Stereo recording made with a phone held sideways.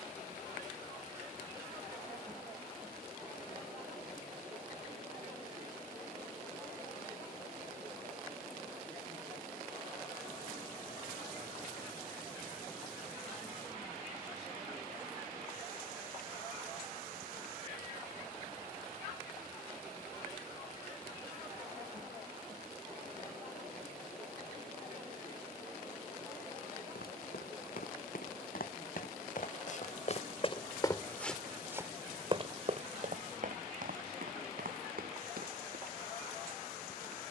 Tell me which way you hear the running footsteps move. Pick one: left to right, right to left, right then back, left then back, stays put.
left to right.